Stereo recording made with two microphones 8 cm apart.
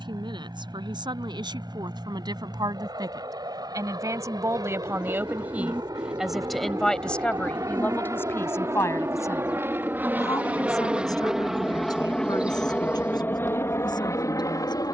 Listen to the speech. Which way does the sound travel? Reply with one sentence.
You can hear the speech go from the right side to the left.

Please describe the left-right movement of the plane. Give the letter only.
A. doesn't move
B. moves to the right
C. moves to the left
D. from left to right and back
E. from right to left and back
C.